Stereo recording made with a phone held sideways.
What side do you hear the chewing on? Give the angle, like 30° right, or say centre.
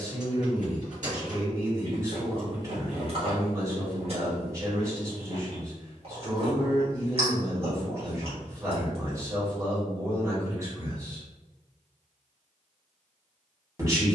50° right.